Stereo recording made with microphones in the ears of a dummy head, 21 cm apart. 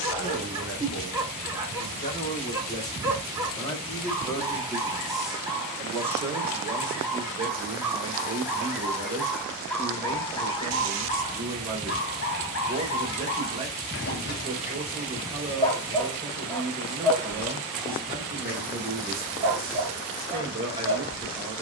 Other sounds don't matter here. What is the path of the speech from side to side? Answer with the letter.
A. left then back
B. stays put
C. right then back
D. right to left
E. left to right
E.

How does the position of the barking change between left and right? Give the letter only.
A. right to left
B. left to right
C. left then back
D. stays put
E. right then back
C.